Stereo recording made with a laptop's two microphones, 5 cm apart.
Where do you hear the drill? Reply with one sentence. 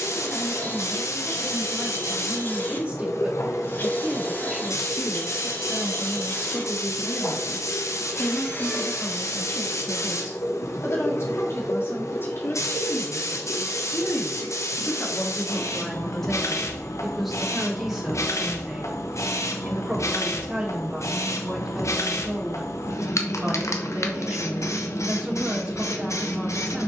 You can hear the drill on the left.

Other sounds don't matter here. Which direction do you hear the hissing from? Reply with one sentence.
You can hear the hissing on the left.